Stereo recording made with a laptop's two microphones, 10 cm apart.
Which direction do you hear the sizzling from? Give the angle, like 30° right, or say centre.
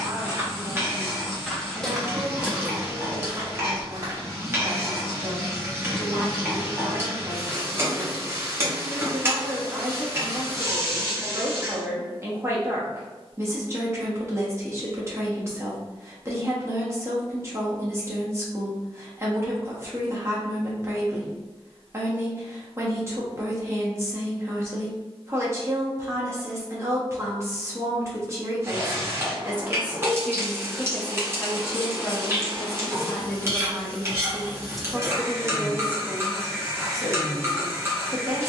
30° right.